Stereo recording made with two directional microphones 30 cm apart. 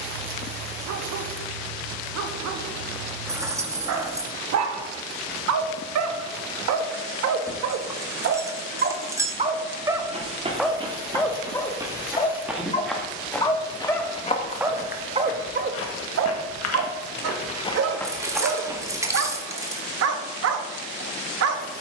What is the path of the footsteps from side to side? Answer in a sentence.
In this clip you hear the footsteps move from right to left and back again.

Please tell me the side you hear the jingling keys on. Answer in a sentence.
In this clip you hear the jingling keys in the centre.